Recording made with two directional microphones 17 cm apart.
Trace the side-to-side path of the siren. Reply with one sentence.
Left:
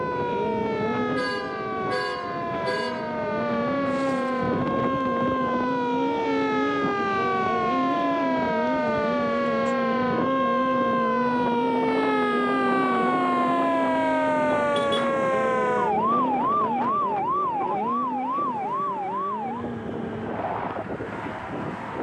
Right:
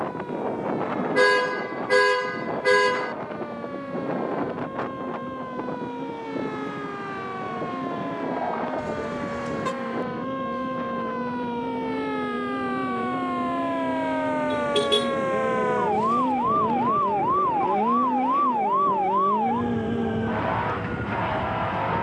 In this clip you hear the siren go from the left side to the right.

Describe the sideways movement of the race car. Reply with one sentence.
In this clip you hear the race car travel towards the right.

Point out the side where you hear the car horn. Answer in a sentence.
You can hear the car horn on the right.